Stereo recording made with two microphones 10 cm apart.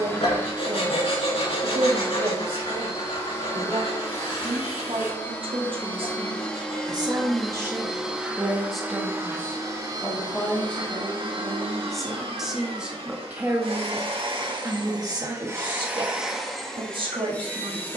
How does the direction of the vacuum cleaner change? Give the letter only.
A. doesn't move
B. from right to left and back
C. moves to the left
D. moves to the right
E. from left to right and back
E.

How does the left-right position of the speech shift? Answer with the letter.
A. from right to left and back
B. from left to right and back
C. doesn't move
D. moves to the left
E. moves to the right
A.